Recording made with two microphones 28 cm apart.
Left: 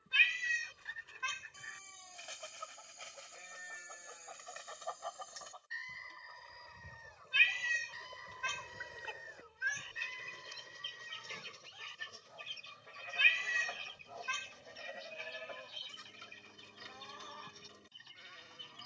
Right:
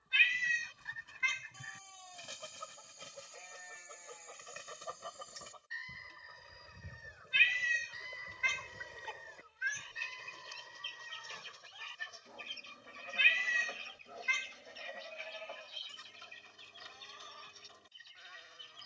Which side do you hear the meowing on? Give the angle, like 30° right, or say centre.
60° left.